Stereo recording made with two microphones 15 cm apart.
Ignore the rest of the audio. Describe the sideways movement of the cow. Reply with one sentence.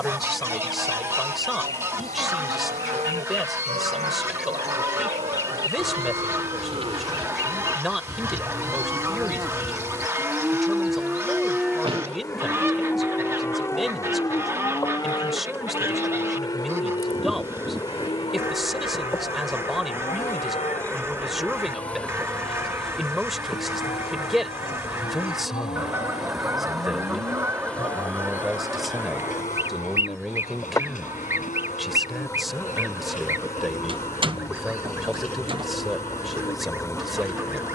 You can hear the cow go from the right side to the left.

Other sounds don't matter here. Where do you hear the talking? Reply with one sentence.
In this clip you hear the talking in the centre.